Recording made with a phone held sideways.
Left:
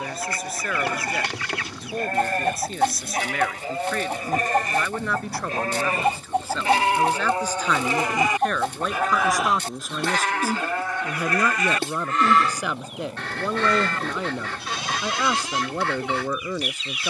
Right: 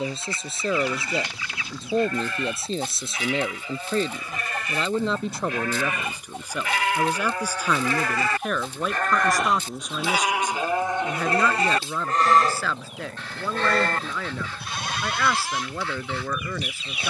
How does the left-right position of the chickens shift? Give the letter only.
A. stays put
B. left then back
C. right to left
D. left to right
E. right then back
A.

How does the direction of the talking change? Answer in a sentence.
You can hear the talking travel towards the left.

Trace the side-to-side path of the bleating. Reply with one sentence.
In this clip you hear the bleating travel towards the right.